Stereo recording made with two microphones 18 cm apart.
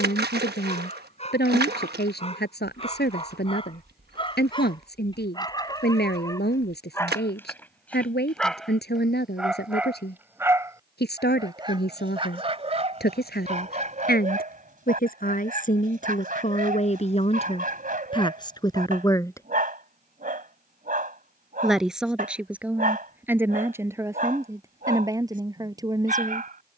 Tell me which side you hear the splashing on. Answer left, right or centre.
right.